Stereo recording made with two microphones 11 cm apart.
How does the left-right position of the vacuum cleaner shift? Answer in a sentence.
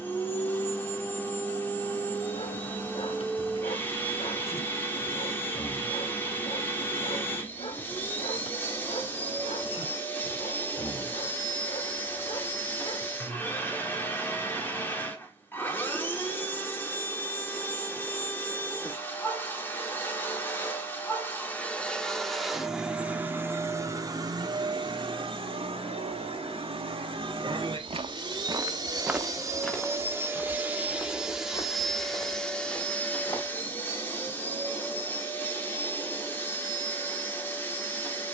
You can hear the vacuum cleaner go right and come back.